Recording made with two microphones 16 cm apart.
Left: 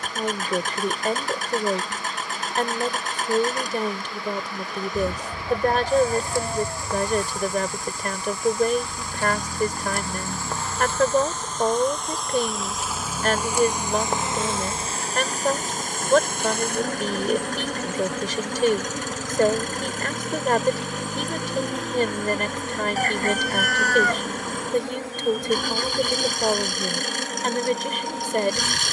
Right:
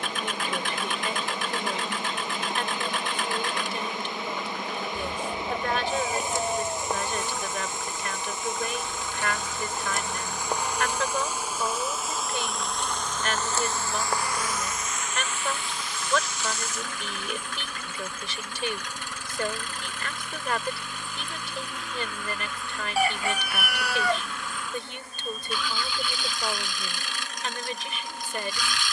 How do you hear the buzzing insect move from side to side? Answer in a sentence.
You can hear the buzzing insect move to the left.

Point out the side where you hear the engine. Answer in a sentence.
You can hear the engine on the left.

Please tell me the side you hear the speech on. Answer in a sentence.
You can hear the speech on the left.